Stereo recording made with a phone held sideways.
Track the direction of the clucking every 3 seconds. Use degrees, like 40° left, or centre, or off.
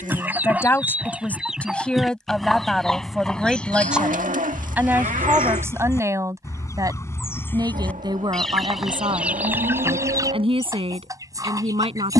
centre, 10° left, 10° left, 20° right.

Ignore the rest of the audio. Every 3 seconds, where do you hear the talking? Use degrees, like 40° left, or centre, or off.
10° left, 10° right, 30° right, 40° right.